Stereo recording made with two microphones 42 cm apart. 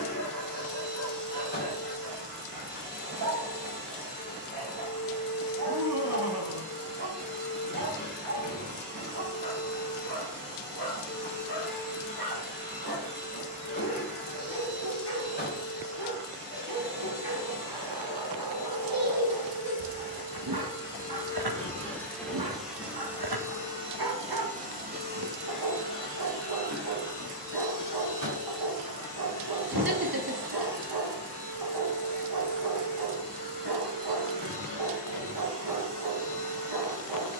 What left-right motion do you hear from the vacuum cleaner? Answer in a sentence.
In this clip you hear the vacuum cleaner move from left to right.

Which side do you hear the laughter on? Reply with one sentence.
In this clip you hear the laughter on the right.